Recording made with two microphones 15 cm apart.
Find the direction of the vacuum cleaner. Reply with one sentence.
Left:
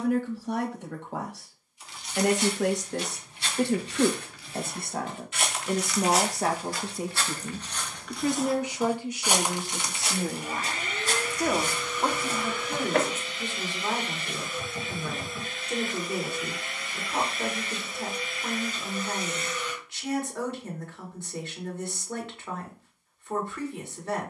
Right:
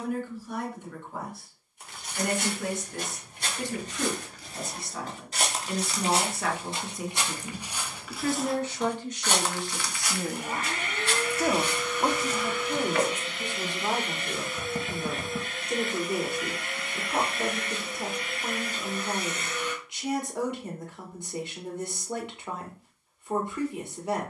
In this clip you hear the vacuum cleaner on the right.